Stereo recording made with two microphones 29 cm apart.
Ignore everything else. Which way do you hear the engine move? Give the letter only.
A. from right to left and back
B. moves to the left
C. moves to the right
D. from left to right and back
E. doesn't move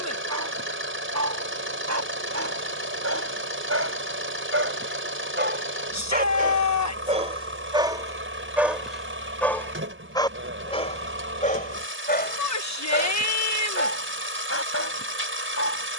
E.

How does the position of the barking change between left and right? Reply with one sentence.
You can hear the barking travel towards the left.